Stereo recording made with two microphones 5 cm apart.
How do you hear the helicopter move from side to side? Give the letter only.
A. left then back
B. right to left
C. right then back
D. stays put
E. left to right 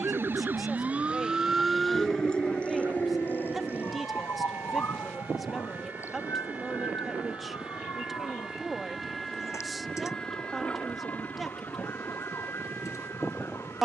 B.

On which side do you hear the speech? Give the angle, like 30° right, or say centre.
centre.